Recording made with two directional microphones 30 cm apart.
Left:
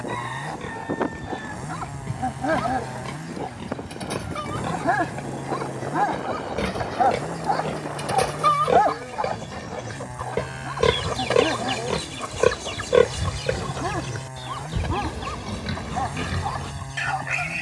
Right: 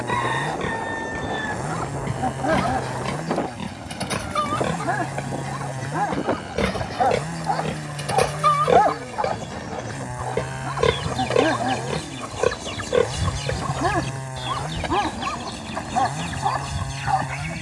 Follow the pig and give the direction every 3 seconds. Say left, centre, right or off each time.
right, right, right, centre, left, left.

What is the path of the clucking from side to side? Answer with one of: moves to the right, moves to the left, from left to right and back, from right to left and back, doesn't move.
from right to left and back.